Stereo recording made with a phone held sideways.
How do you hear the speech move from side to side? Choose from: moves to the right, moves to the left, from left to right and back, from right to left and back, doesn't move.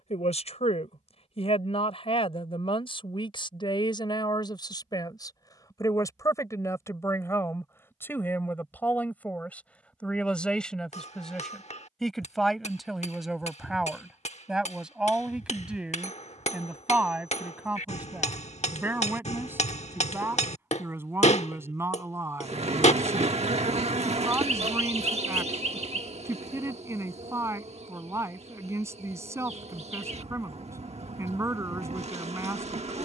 moves to the right.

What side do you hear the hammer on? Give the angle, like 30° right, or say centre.
50° left.